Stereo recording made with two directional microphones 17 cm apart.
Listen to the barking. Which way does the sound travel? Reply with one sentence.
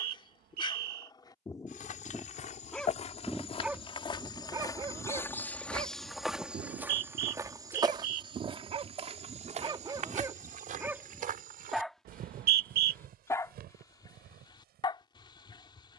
In this clip you hear the barking go right and come back.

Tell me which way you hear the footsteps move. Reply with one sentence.
In this clip you hear the footsteps move from left to right.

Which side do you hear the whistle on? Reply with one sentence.
You can hear the whistle on the right.